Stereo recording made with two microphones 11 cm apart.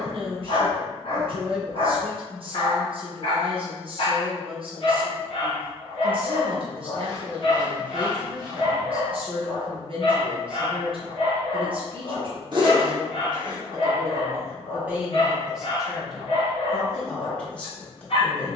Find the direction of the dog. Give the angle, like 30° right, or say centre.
60° left.